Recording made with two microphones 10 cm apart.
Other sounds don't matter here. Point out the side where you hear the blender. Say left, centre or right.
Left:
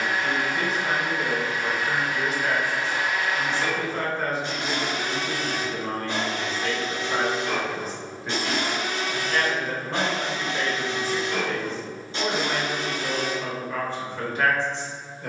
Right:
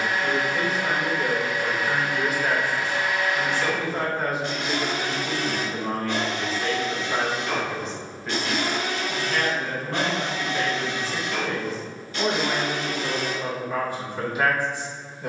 left.